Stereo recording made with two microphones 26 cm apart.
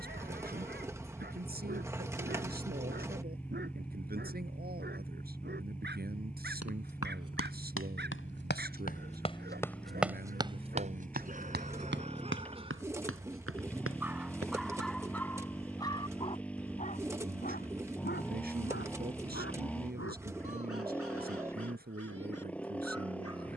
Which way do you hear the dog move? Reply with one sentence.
You can hear the dog move from right to left.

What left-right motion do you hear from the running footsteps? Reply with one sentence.
You can hear the running footsteps move to the right.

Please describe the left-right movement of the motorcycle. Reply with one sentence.
You can hear the motorcycle stay put.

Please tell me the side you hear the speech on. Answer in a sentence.
In this clip you hear the speech on the right.